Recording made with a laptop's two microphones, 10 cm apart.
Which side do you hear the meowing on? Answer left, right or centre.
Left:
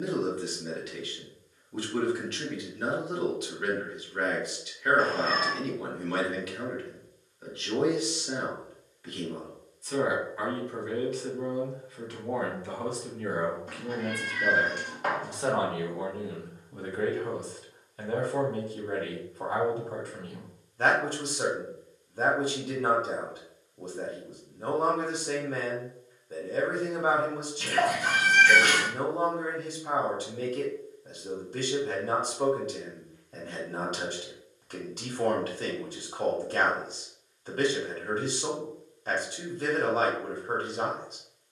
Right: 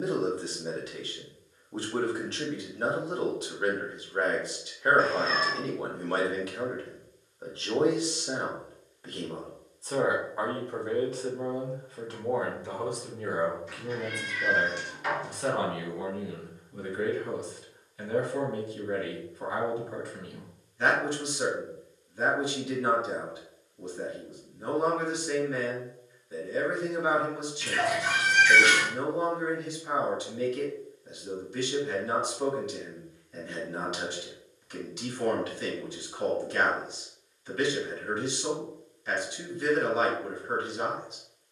left.